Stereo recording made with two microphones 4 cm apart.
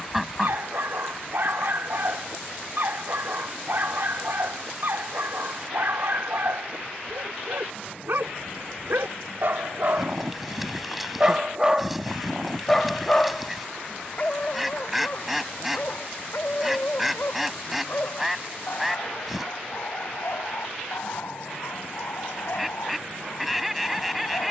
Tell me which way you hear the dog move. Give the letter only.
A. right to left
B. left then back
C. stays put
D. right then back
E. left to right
A.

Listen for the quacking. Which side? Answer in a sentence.
In this clip you hear the quacking in the centre.